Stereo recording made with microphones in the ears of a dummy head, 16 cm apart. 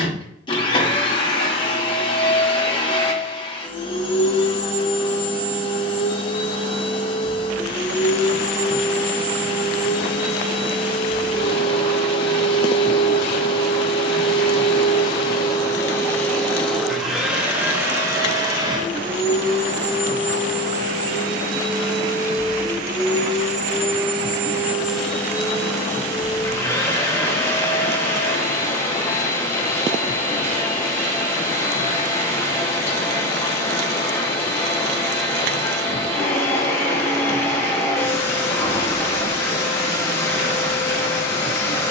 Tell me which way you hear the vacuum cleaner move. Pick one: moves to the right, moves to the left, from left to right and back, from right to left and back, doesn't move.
from left to right and back.